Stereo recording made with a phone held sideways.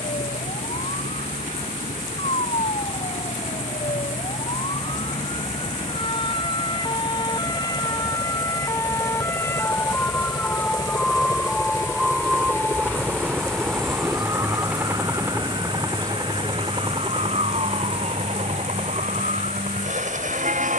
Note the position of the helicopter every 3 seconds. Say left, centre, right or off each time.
left, left, left, left, centre, right, right.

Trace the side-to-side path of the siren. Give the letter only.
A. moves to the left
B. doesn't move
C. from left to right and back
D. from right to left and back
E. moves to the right
E.